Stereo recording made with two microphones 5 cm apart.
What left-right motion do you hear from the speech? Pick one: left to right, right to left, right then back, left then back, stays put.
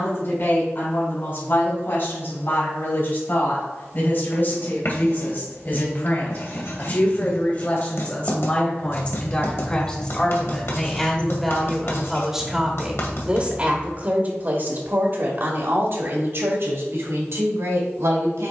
left to right.